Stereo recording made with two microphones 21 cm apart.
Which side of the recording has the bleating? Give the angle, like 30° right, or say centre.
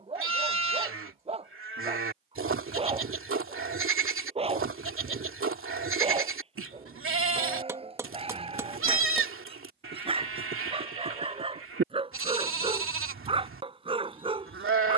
80° right.